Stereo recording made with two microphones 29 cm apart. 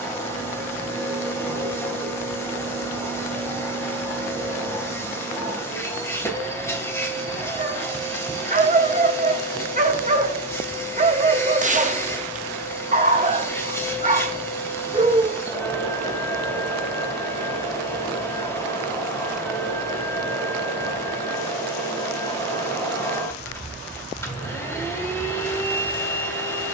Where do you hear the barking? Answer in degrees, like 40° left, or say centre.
30° right.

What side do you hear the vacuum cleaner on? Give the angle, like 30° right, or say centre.
10° left.